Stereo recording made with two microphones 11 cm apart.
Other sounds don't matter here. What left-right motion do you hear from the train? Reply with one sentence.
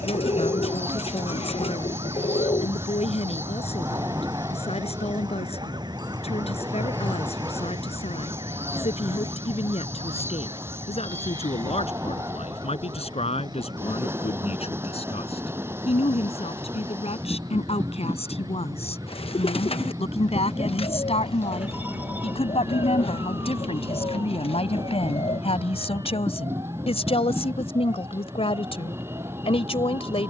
You can hear the train stay in one place.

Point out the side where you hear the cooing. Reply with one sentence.
You can hear the cooing on the left.